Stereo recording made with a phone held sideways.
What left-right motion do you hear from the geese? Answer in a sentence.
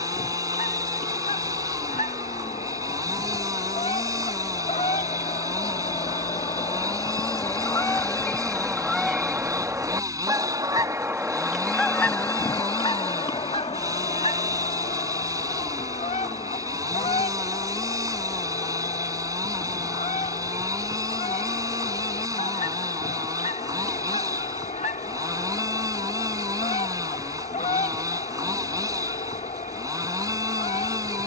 In this clip you hear the geese move from left to right and back again.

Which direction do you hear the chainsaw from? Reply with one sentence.
You can hear the chainsaw on the right.